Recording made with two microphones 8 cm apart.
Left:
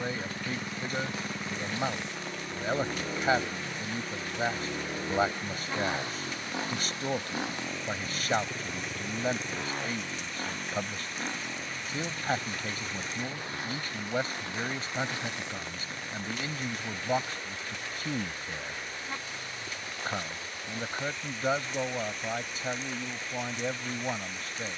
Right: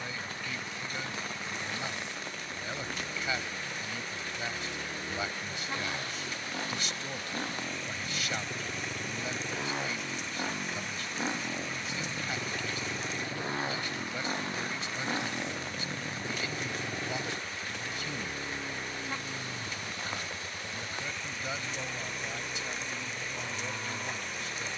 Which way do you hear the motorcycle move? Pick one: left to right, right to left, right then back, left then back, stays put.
left to right.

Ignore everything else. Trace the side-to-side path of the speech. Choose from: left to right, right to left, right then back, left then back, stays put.
stays put.